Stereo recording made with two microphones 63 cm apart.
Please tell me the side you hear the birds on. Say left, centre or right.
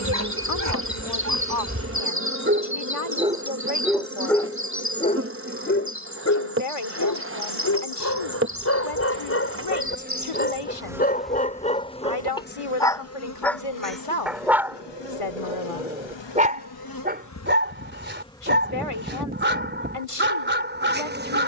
right.